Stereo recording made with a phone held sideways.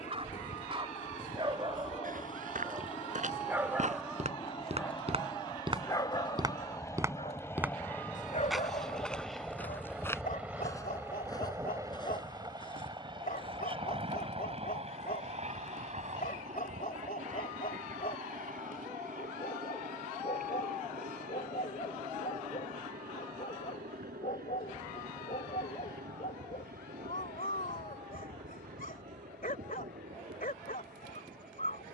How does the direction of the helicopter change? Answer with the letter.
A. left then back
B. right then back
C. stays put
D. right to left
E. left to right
E.